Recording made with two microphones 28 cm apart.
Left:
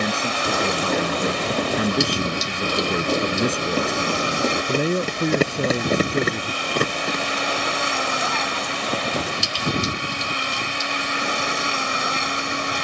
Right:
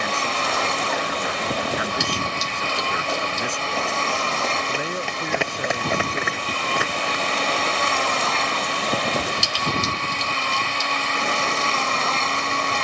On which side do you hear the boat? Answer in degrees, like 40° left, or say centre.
10° left.